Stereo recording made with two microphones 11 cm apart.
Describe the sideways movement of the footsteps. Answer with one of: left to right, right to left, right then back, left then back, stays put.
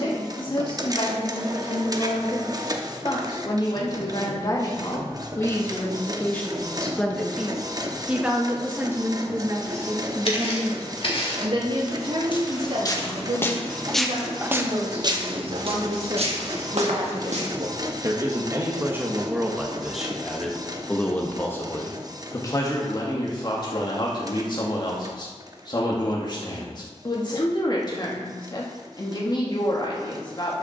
left to right.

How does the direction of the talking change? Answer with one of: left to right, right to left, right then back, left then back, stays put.
right then back.